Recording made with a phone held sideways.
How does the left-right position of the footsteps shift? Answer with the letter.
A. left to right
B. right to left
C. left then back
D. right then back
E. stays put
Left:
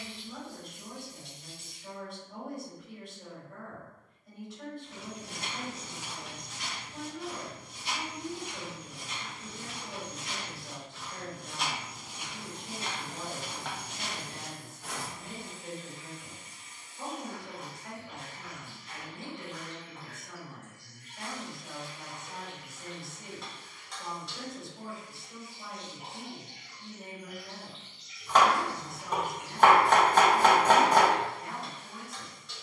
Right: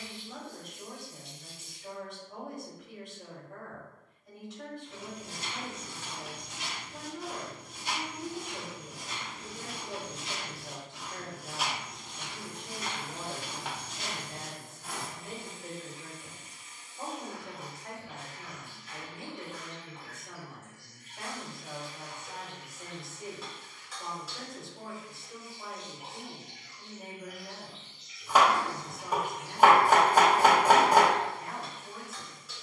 D.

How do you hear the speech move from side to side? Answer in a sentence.
In this clip you hear the speech stay put.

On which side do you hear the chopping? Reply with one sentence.
You can hear the chopping in the centre.